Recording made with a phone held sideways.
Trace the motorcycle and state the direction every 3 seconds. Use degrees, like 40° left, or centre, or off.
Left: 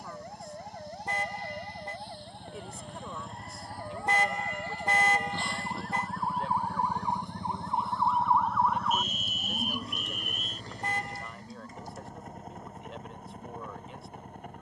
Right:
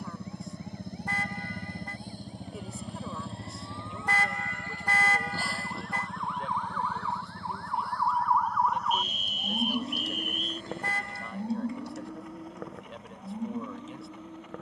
50° right, 20° right, 20° left, 40° left, 50° left.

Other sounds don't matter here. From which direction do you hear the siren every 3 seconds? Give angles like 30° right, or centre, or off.
60° left, 50° left, 20° left, 40° right, 80° right.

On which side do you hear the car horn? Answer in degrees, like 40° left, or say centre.
20° left.